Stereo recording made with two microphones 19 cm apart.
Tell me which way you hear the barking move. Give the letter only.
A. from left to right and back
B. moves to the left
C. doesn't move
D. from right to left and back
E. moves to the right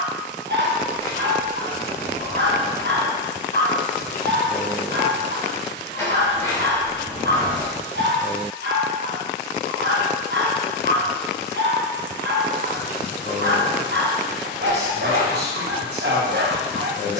C.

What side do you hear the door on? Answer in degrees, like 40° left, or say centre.
20° left.